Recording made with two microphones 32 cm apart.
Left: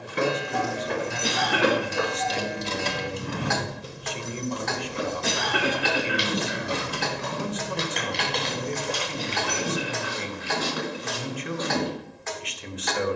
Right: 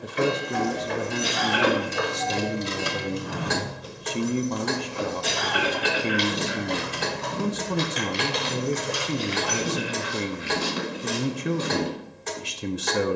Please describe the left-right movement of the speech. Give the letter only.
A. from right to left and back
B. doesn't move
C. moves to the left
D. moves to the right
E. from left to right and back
B.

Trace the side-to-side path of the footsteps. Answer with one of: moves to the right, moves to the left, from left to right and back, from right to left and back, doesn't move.
moves to the right.